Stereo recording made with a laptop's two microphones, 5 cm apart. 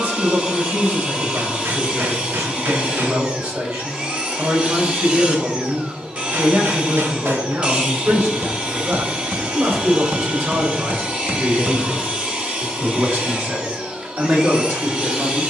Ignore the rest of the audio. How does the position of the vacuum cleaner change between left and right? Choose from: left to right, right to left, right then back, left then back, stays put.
stays put.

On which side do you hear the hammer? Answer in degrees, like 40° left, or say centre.
50° right.